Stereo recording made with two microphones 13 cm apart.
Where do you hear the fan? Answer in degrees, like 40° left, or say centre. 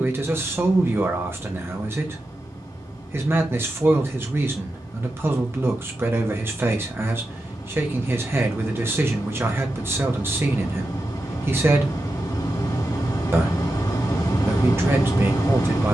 30° left.